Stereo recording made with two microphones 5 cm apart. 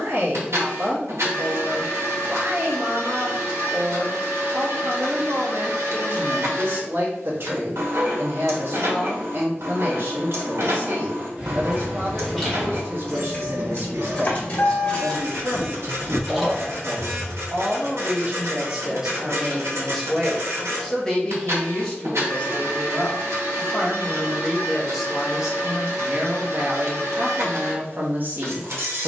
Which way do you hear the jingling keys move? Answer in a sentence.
In this clip you hear the jingling keys move from right to left and back again.